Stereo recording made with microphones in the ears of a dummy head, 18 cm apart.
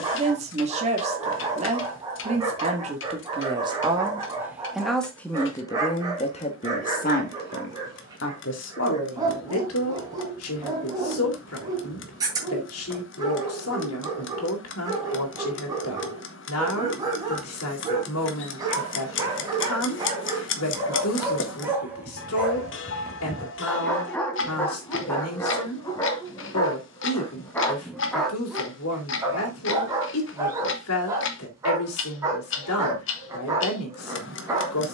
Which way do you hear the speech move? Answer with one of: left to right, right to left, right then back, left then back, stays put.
right to left.